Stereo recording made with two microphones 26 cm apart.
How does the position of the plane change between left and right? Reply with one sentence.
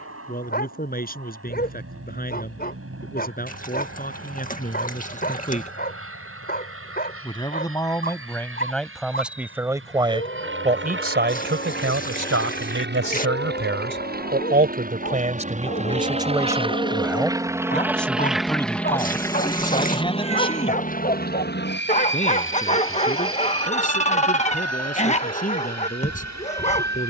In this clip you hear the plane move from right to left.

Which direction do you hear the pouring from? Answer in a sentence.
In this clip you hear the pouring on the left.